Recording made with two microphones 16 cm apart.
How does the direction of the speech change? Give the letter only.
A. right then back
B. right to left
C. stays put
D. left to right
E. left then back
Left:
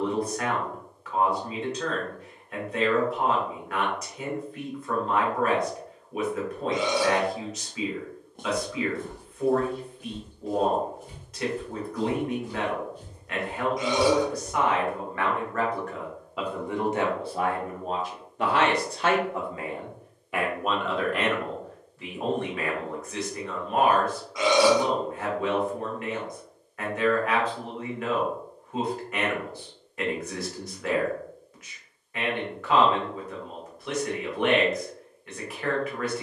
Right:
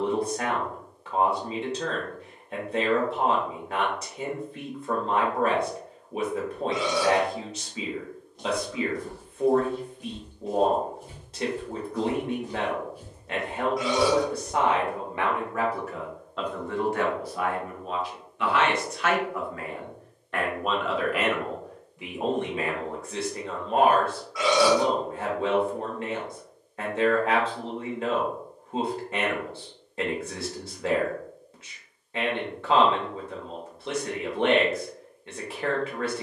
E.